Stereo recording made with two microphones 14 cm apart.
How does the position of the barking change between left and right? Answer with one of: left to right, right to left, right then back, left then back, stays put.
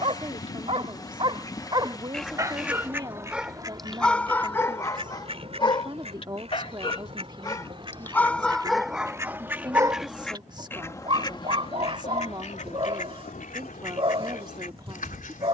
left then back.